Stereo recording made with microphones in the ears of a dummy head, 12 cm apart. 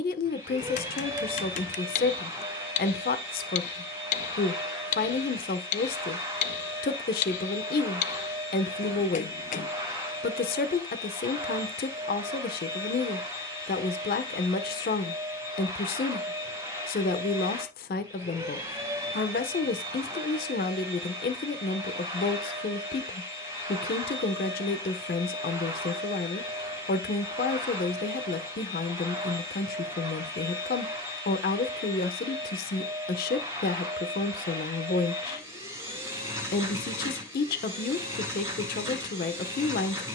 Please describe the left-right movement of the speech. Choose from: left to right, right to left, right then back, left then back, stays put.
stays put.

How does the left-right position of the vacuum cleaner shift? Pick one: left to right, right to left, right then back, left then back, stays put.
stays put.